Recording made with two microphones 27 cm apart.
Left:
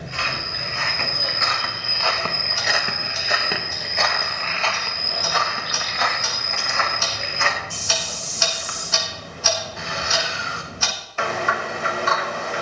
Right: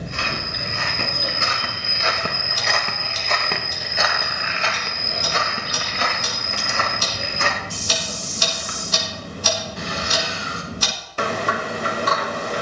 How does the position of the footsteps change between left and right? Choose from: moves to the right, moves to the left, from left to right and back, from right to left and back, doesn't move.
from right to left and back.